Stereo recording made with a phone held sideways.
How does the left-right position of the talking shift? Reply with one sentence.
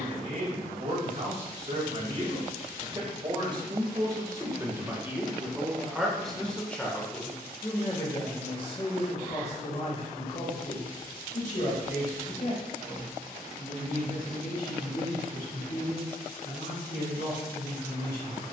You can hear the talking move to the left.